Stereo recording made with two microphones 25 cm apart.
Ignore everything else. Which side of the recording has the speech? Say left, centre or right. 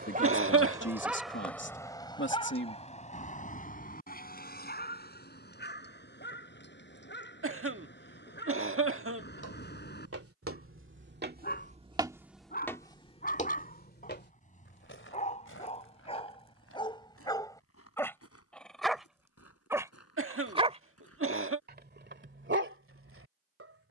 left.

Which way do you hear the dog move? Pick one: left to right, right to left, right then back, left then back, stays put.
left then back.